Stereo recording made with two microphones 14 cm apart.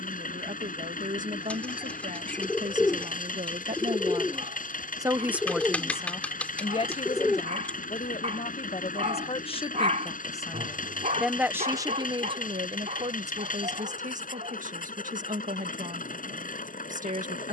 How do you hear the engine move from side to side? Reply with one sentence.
You can hear the engine stay in one place.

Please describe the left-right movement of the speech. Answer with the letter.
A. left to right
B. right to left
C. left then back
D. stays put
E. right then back
C.